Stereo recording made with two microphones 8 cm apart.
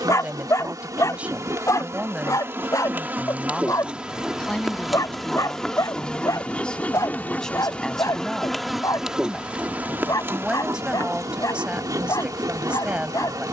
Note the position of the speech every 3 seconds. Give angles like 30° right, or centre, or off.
10° right, 10° left, 10° left, 10° right, 10° right.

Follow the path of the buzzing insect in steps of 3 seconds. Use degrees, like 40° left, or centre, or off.
40° right, 10° right, 10° left, 30° right, 50° right.